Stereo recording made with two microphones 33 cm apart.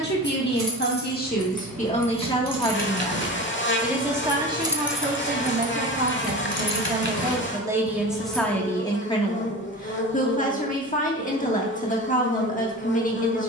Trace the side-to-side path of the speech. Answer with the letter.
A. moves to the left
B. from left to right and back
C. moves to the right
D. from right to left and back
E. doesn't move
B.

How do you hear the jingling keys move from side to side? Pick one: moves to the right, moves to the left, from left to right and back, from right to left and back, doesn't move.
moves to the left.